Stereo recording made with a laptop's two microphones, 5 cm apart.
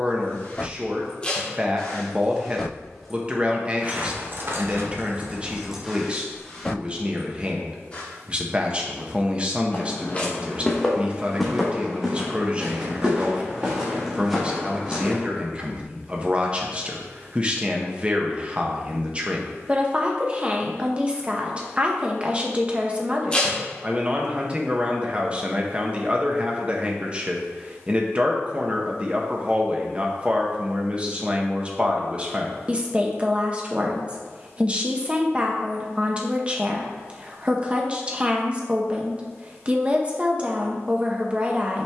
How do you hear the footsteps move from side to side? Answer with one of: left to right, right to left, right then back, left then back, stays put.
right then back.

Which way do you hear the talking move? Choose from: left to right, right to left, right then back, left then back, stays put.
stays put.